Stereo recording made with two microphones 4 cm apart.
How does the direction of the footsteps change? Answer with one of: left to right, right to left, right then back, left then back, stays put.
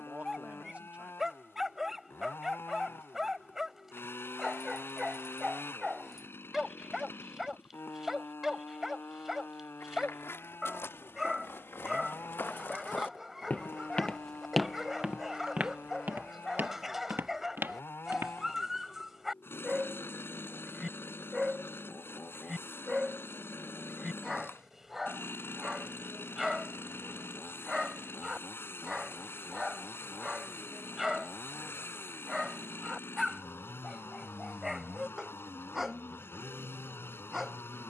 left to right.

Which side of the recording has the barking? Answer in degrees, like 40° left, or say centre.
10° right.